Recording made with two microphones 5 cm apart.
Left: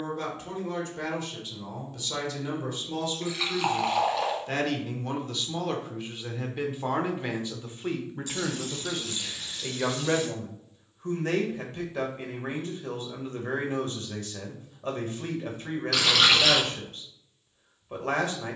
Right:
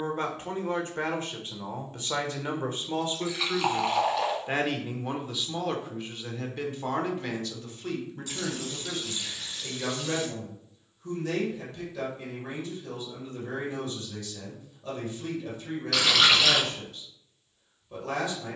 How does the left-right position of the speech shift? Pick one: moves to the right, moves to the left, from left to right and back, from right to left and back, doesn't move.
moves to the left.